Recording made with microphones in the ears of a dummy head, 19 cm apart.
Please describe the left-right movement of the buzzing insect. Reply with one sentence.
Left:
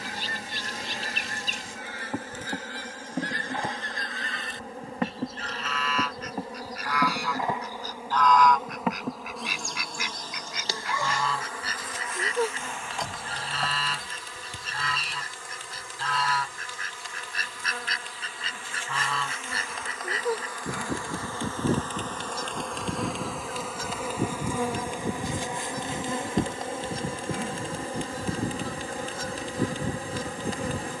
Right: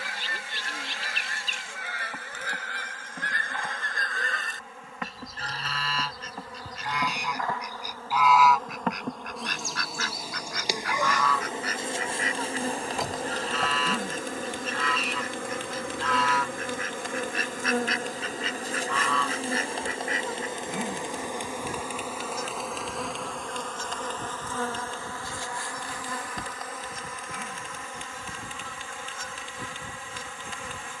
You can hear the buzzing insect move from left to right and back again.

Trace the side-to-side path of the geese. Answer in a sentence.
In this clip you hear the geese move from right to left.